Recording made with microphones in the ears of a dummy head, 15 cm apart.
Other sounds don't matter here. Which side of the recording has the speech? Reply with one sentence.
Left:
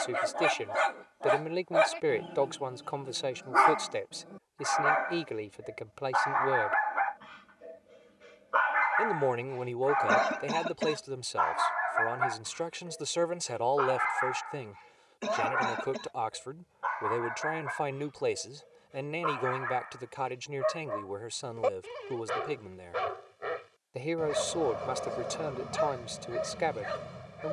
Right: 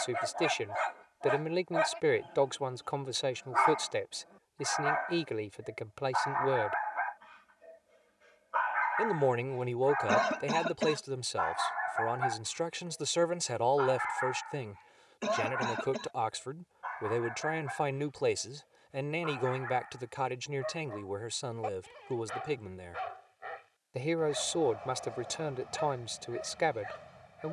In this clip you hear the speech in the centre.